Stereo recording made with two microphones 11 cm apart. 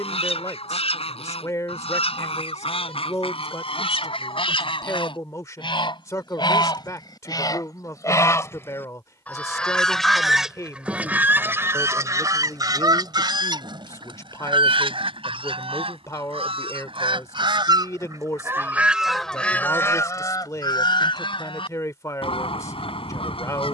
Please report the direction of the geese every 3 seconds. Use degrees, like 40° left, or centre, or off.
70° left, 60° left, 40° left, 10° right, 40° right, 60° right, 10° left, 60° left.